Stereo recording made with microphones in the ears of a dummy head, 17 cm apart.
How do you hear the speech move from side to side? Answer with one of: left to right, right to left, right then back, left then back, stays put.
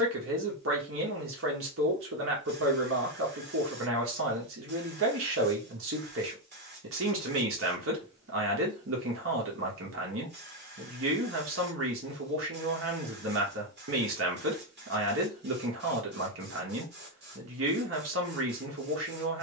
stays put.